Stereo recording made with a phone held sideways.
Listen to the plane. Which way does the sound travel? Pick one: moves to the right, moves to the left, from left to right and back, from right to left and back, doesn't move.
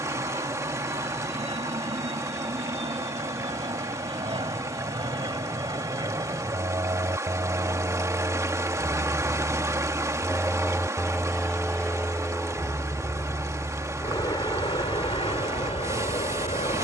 moves to the left.